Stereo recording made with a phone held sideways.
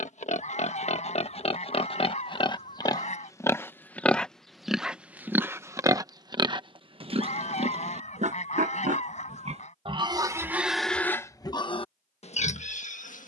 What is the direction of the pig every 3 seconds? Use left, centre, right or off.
left, centre, right, centre, left.